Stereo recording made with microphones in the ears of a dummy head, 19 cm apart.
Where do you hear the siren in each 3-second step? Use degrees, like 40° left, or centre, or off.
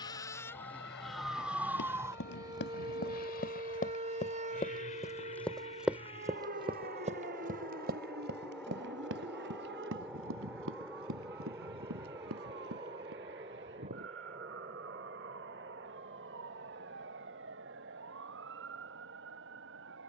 centre, 30° right, 40° right, 50° right, 50° right, 60° right, 60° right.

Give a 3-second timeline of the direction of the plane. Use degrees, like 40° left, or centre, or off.
50° left, 40° left, 20° left, 10° right, 30° right, 40° right, 50° right.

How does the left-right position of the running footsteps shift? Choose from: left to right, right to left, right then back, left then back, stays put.
left to right.